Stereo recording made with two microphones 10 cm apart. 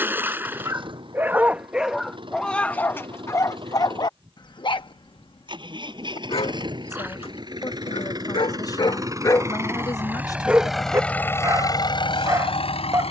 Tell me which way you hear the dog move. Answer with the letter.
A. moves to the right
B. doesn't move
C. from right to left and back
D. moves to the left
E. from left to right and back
C.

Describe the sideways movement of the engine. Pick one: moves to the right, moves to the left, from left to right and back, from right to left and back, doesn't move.
moves to the left.